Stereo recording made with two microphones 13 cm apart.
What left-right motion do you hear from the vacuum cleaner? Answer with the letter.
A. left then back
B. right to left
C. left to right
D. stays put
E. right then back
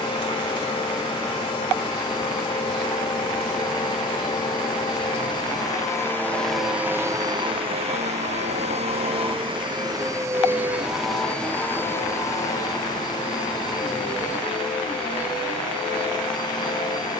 E.